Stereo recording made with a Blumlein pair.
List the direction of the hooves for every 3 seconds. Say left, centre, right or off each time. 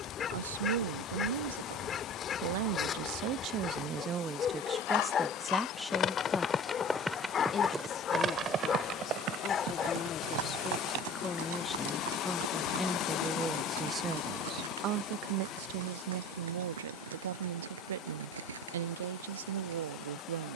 off, left, centre, right, right, right, right.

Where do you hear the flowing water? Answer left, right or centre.
left.